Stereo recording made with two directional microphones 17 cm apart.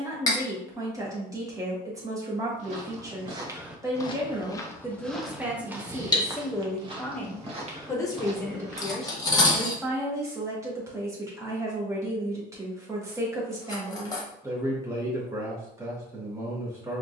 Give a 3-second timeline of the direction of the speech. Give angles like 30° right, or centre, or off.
20° right, 10° right, 10° left, 10° right, 20° right, 20° right.